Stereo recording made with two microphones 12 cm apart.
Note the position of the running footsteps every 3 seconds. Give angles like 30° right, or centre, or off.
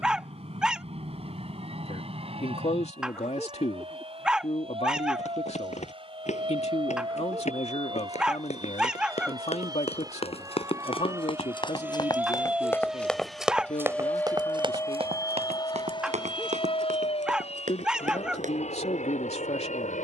off, 70° left, 70° left, 50° left, 10° right, 70° right, 80° right.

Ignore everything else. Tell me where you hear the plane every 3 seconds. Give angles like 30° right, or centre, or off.
60° right, 50° right, 50° right, 30° right, centre, 40° left, 60° left.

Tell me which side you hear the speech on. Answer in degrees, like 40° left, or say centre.
60° left.